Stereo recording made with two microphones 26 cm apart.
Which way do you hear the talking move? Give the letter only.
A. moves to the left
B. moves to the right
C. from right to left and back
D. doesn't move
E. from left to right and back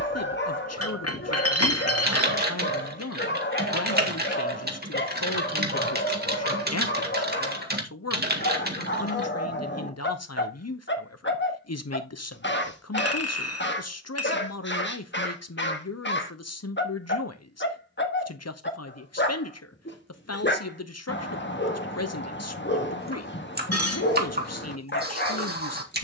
D.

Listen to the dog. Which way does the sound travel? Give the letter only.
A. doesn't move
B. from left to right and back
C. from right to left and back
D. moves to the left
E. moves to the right
A.